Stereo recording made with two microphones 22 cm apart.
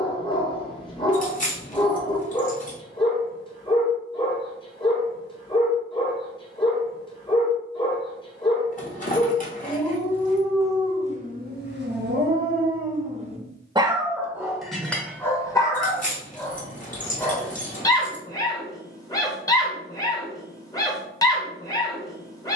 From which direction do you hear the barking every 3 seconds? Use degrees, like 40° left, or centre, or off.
20° left, 20° left, 20° left, 20° right, 30° right, 10° left, 20° left, 20° left.